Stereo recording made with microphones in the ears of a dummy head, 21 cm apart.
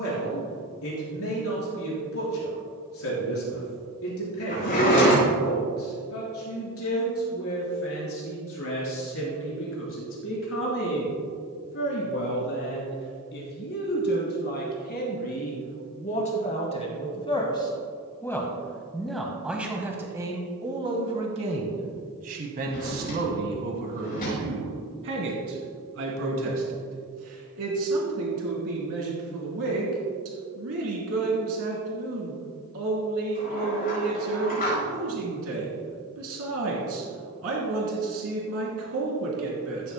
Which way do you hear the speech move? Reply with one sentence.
In this clip you hear the speech travel towards the right.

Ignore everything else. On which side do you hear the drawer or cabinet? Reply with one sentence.
In this clip you hear the drawer or cabinet on the left.